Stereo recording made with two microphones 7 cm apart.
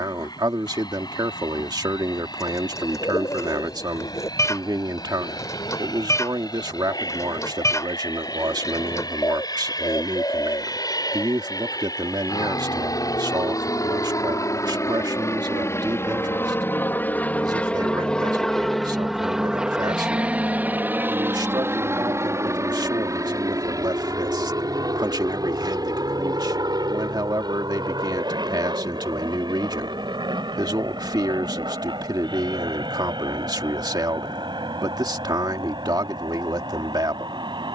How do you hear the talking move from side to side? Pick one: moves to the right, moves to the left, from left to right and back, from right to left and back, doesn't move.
doesn't move.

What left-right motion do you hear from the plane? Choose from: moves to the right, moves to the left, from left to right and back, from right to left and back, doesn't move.
moves to the right.